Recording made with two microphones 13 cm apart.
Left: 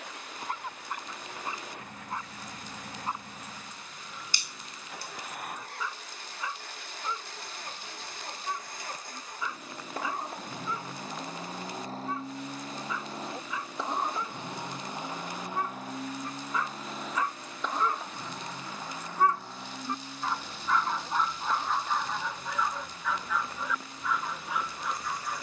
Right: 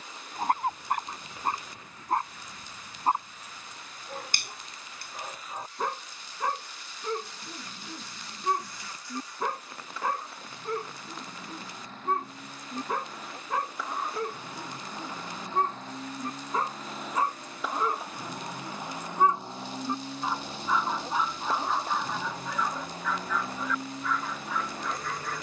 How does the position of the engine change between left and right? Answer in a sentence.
You can hear the engine go from the left side to the right.